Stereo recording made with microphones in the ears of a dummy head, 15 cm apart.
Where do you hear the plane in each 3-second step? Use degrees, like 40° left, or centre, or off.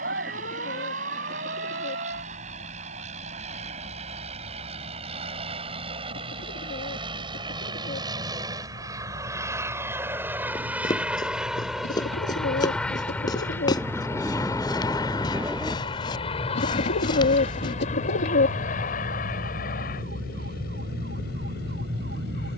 50° right, 40° right, 30° right, 10° right, 10° left, 30° left, 50° left, 60° left.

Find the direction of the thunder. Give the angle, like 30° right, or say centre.
10° right.